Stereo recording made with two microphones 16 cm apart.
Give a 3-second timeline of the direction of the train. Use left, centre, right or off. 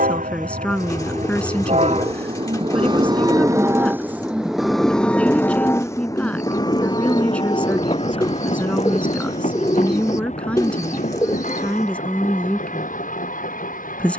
right, centre, left, left, left.